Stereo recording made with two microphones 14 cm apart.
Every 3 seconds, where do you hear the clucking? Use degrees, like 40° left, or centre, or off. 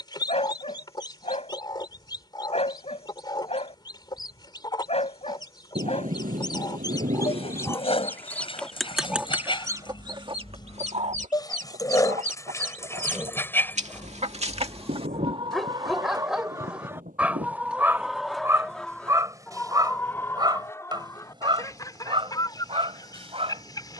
30° left, 30° left, 20° left, 40° right, 60° right, 30° right, 10° left, 30° left.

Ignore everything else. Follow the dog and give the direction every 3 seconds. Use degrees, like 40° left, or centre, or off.
50° left, 50° left, 40° left, 30° left, 10° left, 10° right, 30° right, 40° right.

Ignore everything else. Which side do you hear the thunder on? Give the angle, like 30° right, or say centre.
80° right.